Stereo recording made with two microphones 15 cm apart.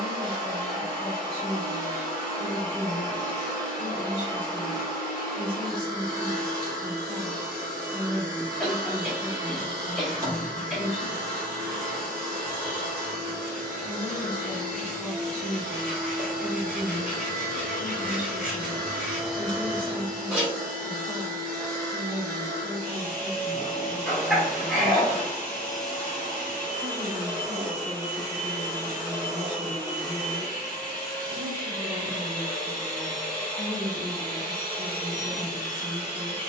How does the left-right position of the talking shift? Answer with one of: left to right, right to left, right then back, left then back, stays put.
left to right.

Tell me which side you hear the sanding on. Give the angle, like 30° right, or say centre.
10° right.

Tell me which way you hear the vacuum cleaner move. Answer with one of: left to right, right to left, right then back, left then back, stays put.
stays put.